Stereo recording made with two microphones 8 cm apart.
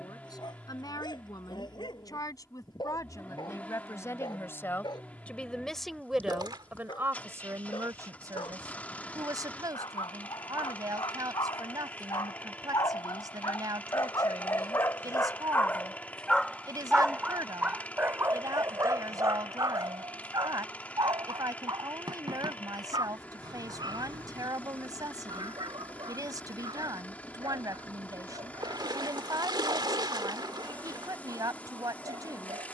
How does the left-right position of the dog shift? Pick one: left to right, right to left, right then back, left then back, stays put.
left to right.